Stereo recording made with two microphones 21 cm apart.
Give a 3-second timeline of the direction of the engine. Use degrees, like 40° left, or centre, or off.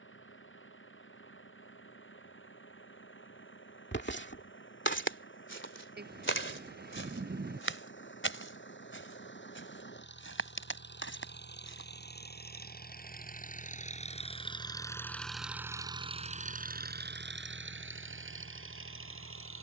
70° left, 70° left, 60° left, 60° left, 40° left, 30° right, 70° right.